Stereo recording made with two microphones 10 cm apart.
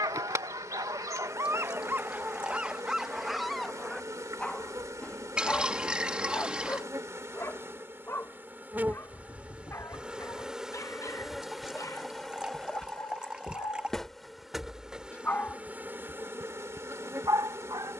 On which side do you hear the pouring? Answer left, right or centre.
centre.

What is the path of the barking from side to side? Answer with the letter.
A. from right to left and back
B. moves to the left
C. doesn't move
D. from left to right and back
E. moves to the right
A.